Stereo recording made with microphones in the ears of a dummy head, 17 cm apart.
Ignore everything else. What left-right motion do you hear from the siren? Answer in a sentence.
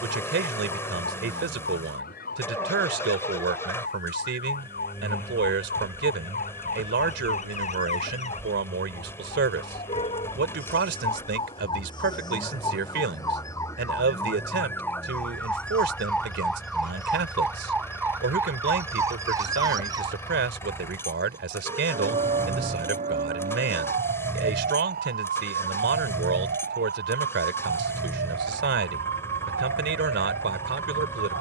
In this clip you hear the siren move from left to right.